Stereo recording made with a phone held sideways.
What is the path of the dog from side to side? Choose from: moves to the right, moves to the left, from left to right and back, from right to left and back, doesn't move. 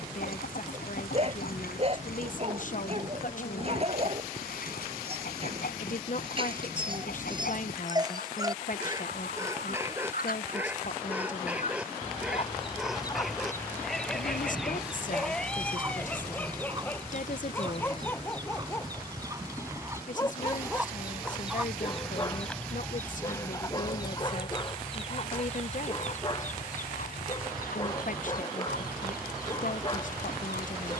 moves to the left.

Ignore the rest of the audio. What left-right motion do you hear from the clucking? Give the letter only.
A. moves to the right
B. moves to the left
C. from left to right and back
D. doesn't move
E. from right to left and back
C.